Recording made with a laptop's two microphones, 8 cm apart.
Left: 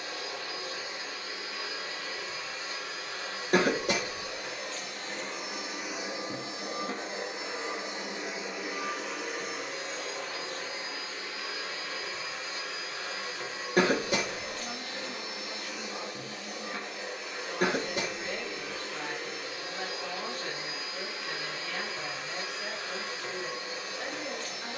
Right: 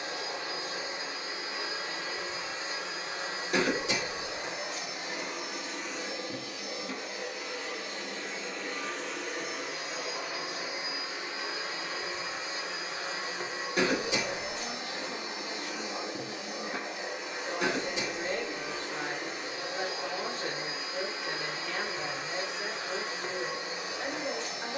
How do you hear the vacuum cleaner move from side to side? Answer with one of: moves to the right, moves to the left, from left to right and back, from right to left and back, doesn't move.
from right to left and back.